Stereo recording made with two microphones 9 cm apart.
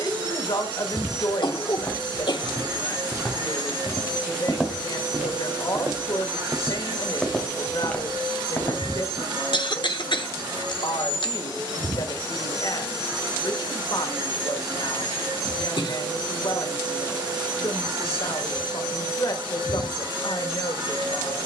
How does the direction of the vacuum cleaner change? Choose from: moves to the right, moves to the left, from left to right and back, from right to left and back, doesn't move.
doesn't move.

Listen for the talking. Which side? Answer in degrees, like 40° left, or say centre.
60° left.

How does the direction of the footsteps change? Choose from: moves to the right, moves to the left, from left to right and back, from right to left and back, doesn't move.
from left to right and back.